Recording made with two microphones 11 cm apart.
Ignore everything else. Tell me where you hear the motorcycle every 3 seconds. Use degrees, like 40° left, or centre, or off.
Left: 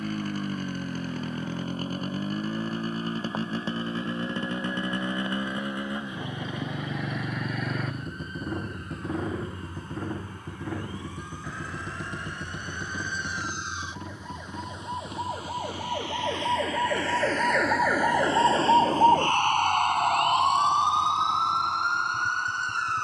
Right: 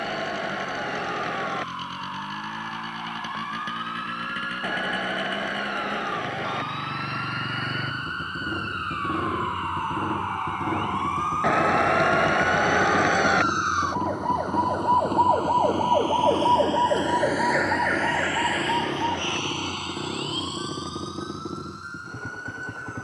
40° left, 30° left, 10° left, 20° right, 40° right, 50° right, 60° right, 70° right.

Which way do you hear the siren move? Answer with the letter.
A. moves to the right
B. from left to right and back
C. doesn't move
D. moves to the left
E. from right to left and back
D.